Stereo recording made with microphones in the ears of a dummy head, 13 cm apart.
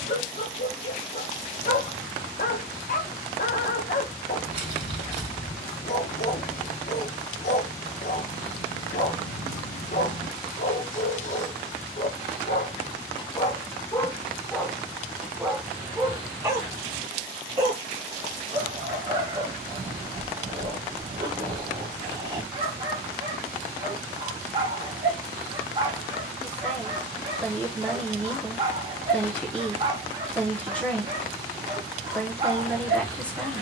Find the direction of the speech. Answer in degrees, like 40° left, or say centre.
10° left.